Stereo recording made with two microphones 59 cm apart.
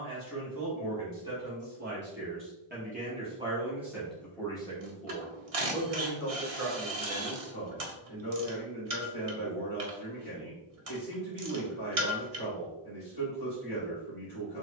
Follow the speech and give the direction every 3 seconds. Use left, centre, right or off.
right, centre, left, left, left.